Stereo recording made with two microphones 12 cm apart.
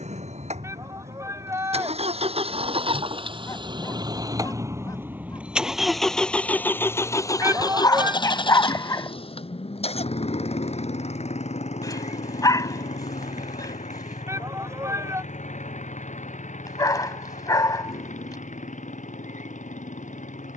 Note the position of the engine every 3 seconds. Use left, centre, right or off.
right, right, left, left, left, left, left.